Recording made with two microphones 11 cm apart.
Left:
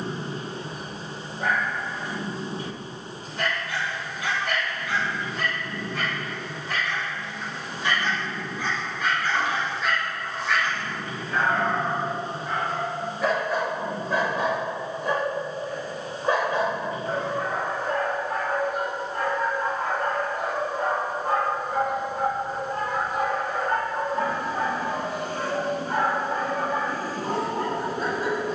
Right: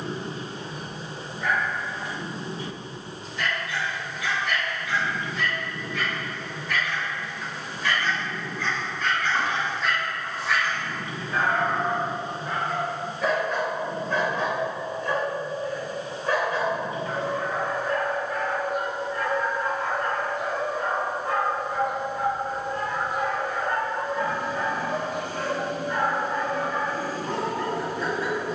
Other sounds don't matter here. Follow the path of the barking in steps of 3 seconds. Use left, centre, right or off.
left, left, left, centre, centre, left, left, left, left, left.